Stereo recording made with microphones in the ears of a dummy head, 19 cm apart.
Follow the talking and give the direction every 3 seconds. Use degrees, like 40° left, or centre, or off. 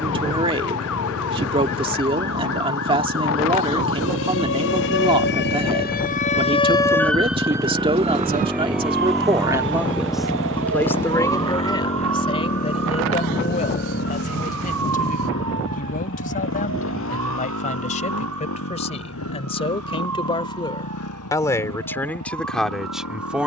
30° right, 30° right, 30° right, centre, 30° left, 40° left, 30° left, centre.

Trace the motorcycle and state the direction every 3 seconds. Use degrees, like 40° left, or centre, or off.
50° right, 40° right, 20° right, 20° left, 40° left, 60° left, 70° left, 80° left.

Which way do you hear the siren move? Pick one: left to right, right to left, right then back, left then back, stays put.
left to right.